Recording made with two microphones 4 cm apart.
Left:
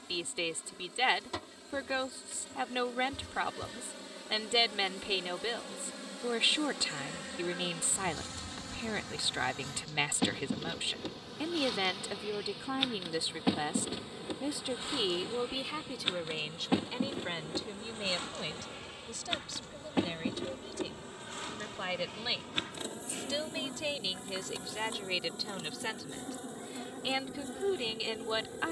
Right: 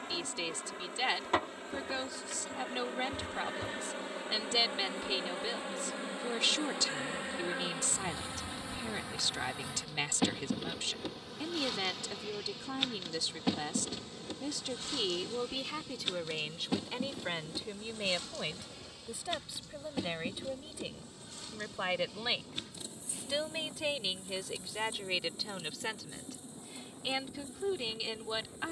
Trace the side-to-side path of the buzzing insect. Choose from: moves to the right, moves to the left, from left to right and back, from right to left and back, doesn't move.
moves to the left.